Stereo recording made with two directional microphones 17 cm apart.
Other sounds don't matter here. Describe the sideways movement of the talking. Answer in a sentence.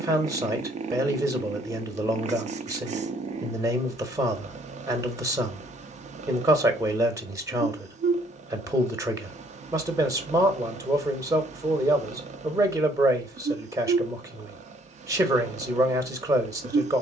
In this clip you hear the talking stay in one place.